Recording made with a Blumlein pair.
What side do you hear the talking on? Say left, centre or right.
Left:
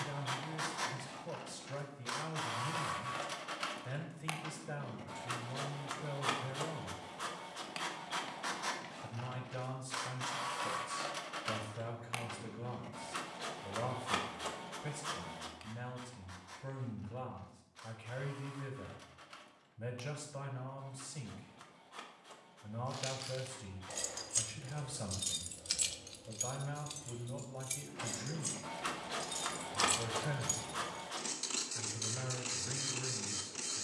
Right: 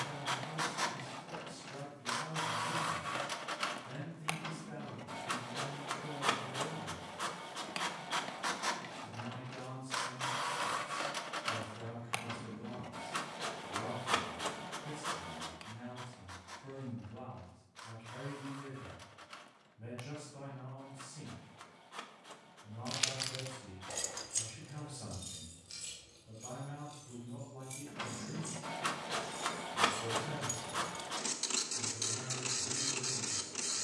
left.